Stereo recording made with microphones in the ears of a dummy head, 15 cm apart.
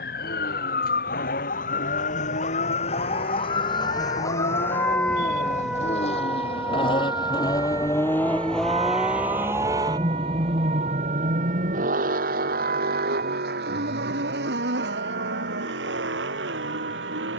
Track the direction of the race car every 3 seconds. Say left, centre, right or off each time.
left, left, left, right, right, right.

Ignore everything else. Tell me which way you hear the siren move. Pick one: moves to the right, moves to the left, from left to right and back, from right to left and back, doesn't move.
moves to the right.